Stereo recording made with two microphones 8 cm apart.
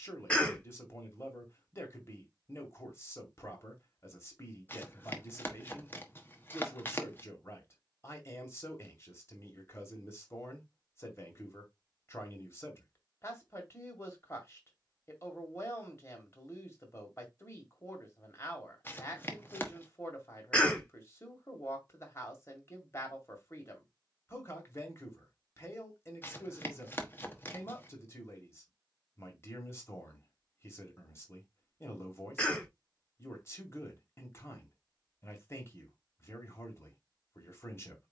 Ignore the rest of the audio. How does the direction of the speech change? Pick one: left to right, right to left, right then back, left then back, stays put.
stays put.